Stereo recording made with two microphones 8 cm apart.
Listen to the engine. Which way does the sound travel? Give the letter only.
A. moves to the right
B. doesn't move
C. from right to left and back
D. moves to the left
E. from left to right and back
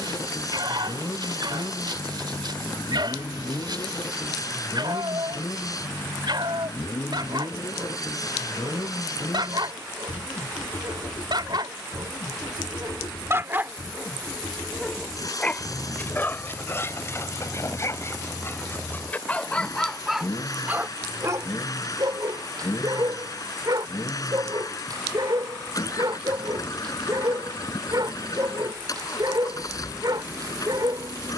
B.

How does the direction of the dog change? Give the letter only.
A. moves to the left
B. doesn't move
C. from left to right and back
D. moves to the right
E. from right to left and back
E.